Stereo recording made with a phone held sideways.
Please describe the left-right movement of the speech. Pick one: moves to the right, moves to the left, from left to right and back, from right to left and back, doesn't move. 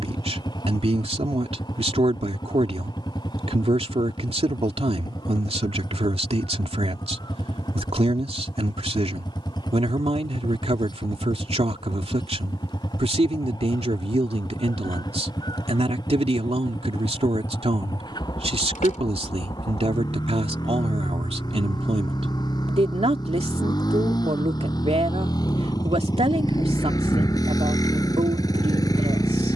doesn't move.